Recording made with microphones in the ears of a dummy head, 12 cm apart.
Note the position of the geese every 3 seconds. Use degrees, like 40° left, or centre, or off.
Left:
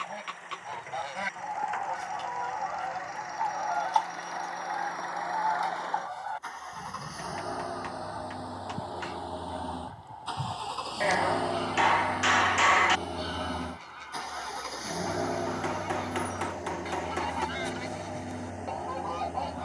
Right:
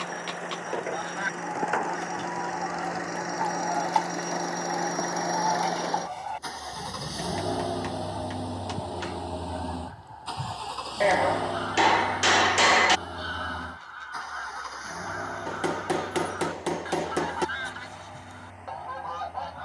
10° left, 10° right, 10° right, 10° left, 10° left, 10° left, 10° left.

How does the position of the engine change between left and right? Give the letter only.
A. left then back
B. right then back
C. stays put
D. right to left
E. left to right
D.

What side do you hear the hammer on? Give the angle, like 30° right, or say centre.
40° right.